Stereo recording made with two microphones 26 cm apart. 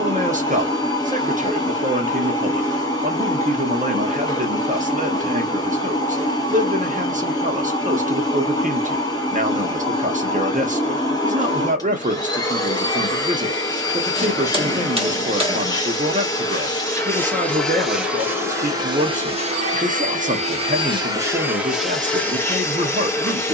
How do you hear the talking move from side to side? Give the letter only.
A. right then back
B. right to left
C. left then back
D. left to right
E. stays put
E.